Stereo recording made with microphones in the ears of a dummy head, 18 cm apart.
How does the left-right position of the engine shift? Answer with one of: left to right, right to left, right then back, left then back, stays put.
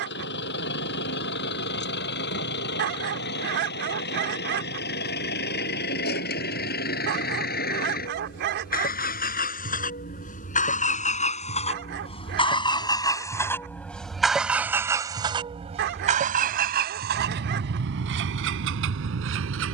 left to right.